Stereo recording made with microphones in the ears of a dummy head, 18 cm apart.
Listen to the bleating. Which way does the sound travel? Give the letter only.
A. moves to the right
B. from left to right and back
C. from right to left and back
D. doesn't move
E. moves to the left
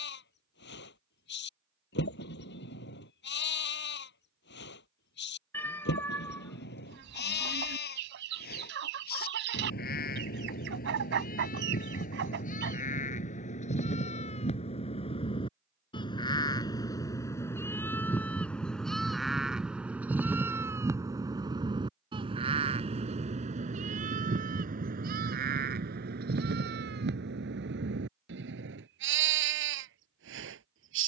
A.